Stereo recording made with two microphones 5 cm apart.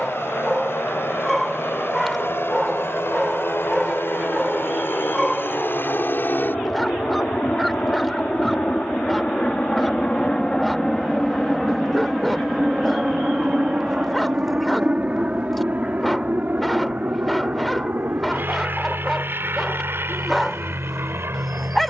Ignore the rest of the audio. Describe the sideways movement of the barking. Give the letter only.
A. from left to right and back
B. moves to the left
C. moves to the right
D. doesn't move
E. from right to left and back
D.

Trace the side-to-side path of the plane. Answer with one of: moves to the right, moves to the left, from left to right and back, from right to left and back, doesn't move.
moves to the right.